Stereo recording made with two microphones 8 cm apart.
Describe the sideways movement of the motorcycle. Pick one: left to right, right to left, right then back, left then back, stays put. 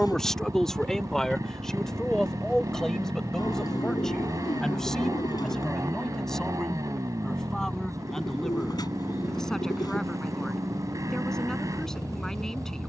stays put.